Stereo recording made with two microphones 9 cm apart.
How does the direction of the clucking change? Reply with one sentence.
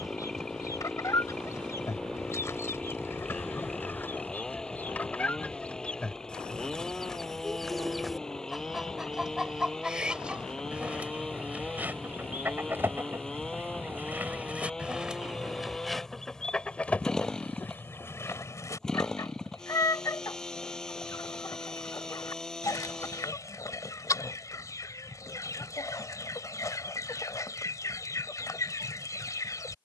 You can hear the clucking move from left to right and back again.